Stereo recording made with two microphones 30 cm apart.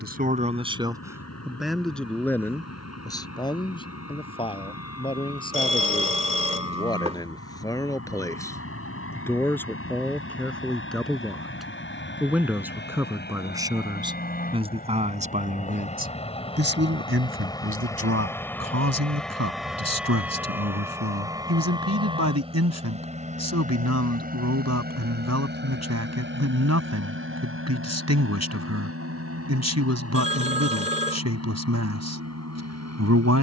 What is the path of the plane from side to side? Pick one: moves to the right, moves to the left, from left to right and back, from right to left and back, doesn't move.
moves to the right.